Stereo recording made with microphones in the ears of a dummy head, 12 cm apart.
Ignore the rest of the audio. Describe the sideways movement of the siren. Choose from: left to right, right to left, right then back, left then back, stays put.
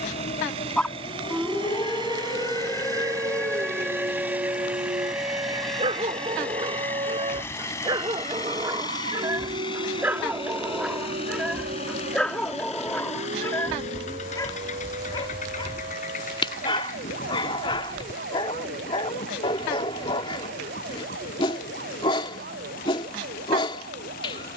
left to right.